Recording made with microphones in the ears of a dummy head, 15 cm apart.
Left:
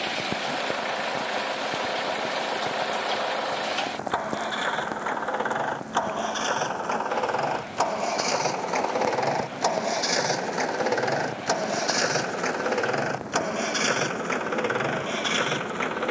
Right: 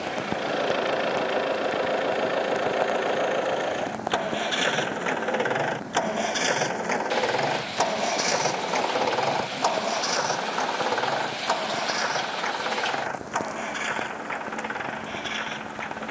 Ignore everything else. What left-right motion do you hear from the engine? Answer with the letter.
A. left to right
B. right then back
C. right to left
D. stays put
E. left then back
C.